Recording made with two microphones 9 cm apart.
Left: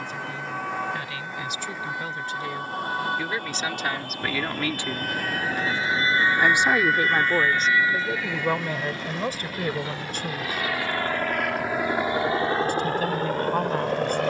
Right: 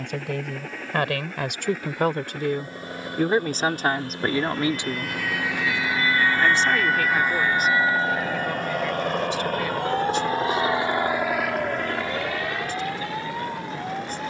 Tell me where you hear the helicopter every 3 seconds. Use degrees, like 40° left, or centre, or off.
80° right, 80° right, 70° right, 30° right, 40° left.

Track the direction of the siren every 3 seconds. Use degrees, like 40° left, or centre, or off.
70° left, 50° left, 20° right, 60° right, 70° right.